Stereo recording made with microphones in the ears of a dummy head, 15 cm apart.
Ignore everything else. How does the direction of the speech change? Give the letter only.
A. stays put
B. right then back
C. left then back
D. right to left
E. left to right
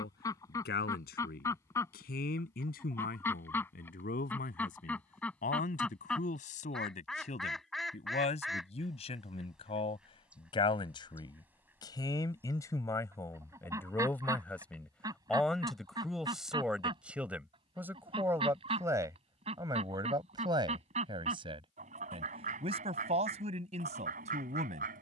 E.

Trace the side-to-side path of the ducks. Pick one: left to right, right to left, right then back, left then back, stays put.
left to right.